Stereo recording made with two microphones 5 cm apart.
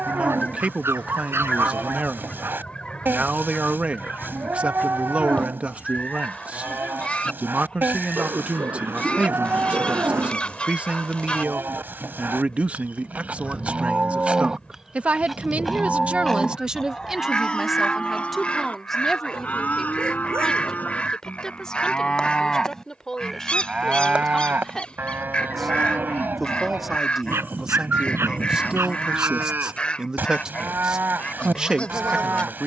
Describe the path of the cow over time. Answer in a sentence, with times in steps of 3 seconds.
You can hear the cow on the right from 0 s, in the centre from 15 s, on the left from 18 s, in the centre from 21 s and on the right from 24 s.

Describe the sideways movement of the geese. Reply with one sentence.
In this clip you hear the geese stay in one place.